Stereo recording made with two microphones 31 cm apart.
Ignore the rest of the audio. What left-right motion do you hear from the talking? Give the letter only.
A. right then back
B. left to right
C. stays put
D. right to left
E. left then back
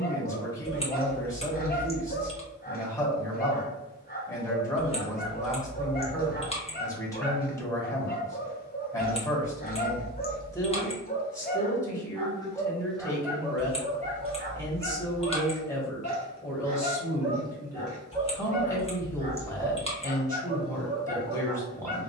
C.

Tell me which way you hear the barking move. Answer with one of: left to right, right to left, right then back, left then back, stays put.
left to right.